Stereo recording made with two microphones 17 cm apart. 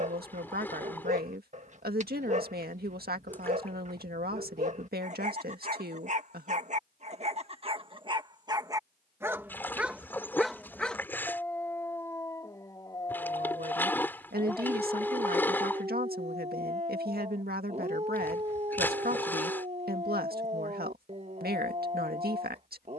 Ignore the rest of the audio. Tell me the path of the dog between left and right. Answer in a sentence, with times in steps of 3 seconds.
You can hear the dog on the right from 0 s, in the centre from 9 s and on the right from 15 s.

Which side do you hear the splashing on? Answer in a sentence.
In this clip you hear the splashing in the centre.